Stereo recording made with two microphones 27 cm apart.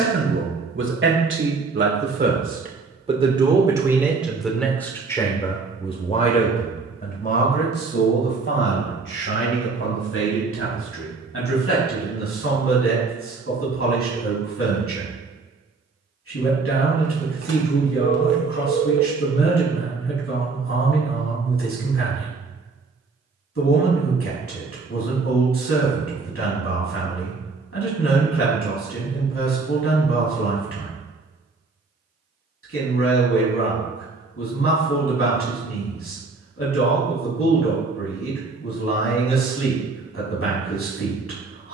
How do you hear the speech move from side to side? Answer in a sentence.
You can hear the speech move from right to left.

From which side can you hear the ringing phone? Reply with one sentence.
In this clip you hear the ringing phone on the right.